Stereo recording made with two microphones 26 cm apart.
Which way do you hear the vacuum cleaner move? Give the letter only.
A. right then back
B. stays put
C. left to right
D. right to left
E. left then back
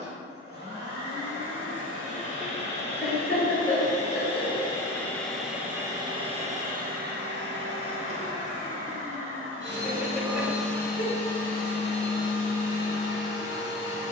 A.